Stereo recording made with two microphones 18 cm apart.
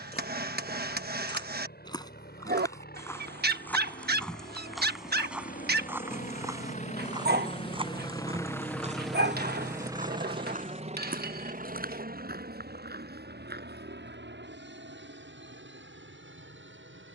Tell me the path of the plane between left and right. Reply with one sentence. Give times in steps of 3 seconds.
You can hear the plane on the left from 0 s and on the right from 9 s.